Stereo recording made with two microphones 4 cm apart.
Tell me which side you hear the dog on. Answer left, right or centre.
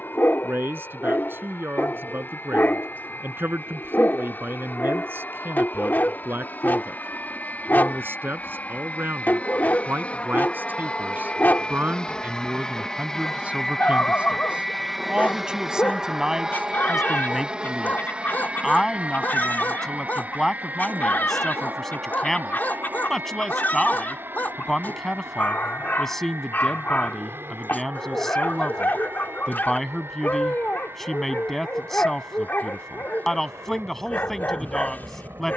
left.